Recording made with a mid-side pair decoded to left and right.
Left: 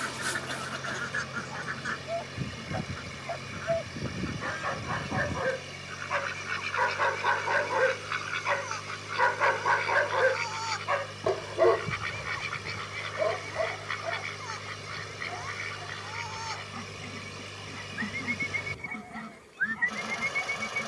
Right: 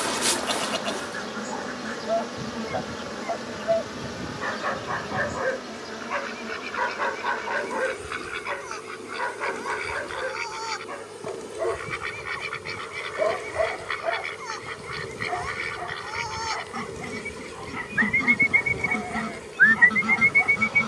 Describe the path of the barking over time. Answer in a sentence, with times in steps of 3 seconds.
You can hear the barking on the right from 0 s, in the centre from 6 s, on the left from 9 s and on the right from 12 s.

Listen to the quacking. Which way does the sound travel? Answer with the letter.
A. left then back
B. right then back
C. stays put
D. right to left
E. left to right
E.